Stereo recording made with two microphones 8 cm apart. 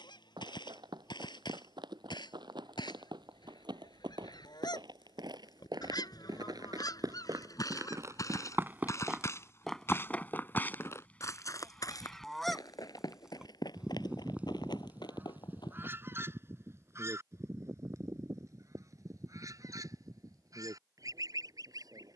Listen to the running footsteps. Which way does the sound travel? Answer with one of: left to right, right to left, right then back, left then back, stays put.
right to left.